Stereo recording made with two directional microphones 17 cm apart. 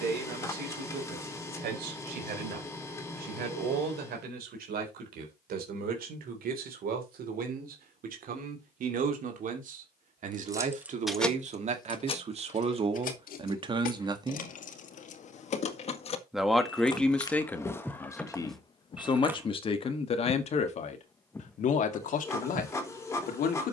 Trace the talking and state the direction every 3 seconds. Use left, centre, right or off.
right, right, right, right, right, centre, left, left.